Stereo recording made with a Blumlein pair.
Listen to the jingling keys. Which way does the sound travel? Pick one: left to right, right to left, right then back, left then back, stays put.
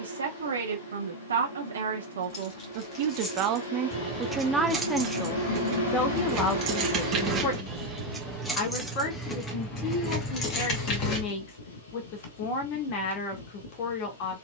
right then back.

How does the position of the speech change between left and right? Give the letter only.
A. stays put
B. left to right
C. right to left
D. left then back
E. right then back
C.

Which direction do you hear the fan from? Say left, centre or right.
left.